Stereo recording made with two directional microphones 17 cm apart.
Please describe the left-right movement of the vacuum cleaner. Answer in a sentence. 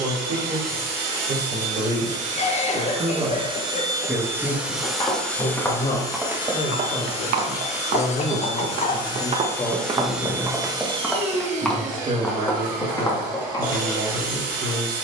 In this clip you hear the vacuum cleaner go left and come back.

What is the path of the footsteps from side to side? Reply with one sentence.
You can hear the footsteps go right and come back.